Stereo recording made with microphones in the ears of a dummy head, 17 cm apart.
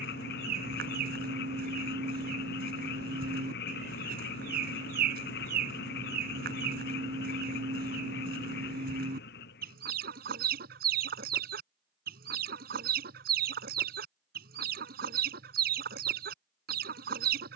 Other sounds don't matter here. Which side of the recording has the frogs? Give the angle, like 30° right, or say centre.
60° left.